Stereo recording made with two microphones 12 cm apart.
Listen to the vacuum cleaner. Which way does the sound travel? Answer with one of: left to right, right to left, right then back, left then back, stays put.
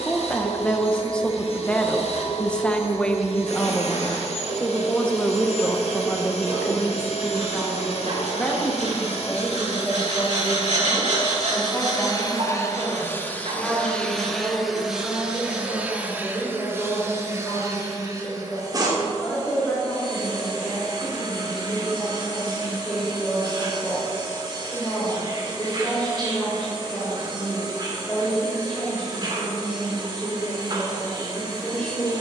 left to right.